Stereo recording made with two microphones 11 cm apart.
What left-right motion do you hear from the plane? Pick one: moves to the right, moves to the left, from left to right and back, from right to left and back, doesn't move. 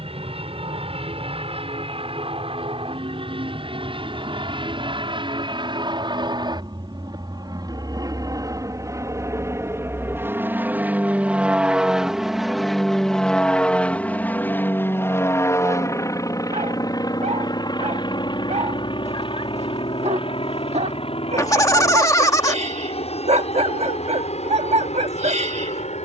moves to the left.